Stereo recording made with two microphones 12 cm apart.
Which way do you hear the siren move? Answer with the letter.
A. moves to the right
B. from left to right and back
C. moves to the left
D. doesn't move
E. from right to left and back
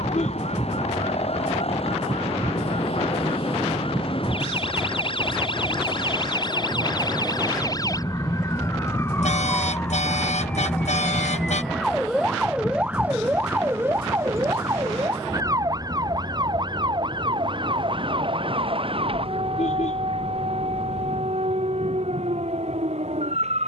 A.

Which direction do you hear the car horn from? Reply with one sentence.
You can hear the car horn on the left.